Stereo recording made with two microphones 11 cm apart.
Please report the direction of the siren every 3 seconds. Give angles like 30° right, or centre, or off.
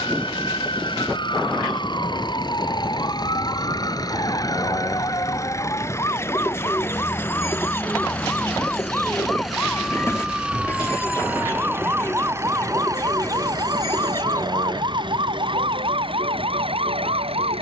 40° left, 40° left, 20° left, centre, 30° right, 50° right.